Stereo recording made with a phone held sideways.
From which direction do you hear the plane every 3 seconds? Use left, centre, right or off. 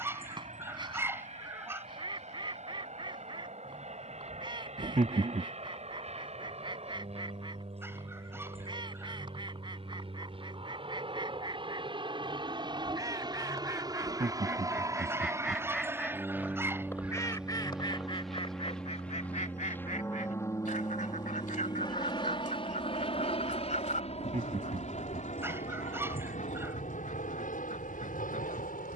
right, right, right, right, right, centre, centre, left, left, left.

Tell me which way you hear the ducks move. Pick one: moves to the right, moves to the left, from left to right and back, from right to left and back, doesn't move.
moves to the left.